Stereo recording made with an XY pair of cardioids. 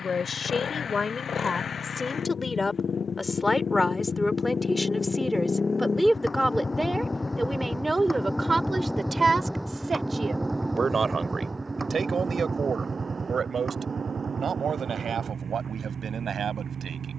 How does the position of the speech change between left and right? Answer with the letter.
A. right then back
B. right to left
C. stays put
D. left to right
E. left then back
D.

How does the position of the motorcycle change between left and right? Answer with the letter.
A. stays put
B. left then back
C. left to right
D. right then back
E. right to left
C.